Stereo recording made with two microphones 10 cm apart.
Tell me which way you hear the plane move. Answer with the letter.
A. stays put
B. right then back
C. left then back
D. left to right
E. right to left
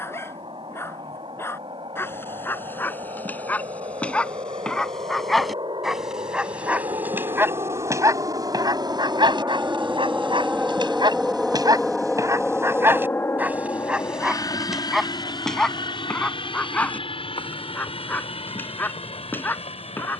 E.